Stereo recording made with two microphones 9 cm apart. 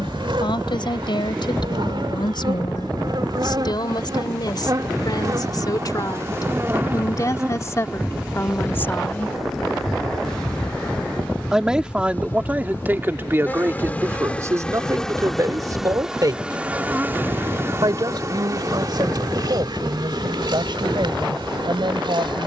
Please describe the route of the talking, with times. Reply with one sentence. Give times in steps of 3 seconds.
In this clip you hear the talking on the left from 0 s, in the centre from 9 s and on the right from 12 s.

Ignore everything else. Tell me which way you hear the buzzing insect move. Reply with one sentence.
You can hear the buzzing insect go left and come back.